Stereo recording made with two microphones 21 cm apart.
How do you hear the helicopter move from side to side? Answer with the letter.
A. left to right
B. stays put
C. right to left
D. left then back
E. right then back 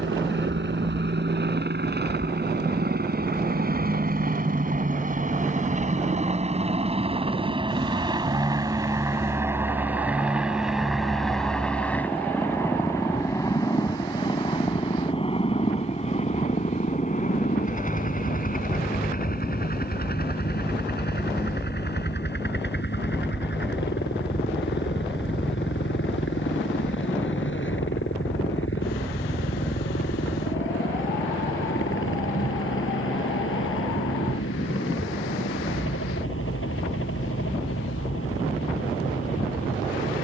C.